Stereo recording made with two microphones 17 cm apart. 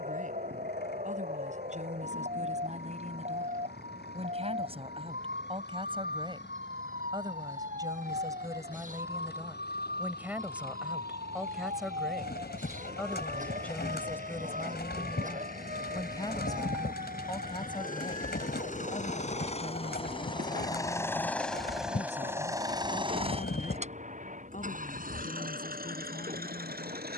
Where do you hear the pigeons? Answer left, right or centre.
left.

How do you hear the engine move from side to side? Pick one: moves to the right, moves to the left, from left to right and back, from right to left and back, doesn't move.
moves to the right.